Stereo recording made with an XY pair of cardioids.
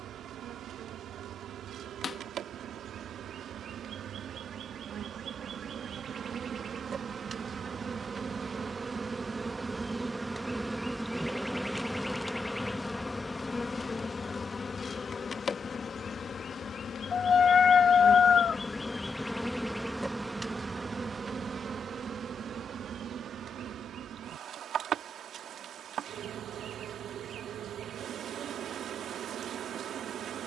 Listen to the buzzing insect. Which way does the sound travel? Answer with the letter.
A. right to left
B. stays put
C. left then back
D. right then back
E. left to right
C.